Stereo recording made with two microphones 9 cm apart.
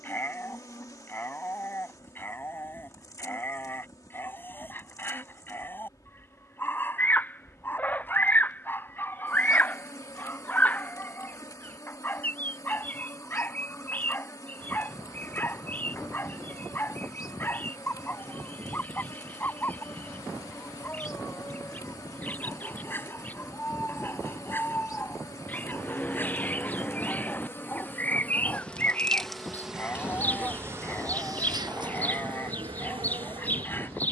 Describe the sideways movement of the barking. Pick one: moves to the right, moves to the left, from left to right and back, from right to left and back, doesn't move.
doesn't move.